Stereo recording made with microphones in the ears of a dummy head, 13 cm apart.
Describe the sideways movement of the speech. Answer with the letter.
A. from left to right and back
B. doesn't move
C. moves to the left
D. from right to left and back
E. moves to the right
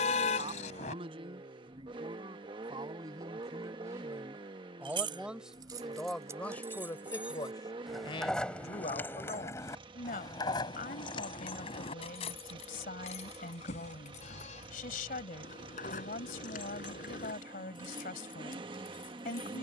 C.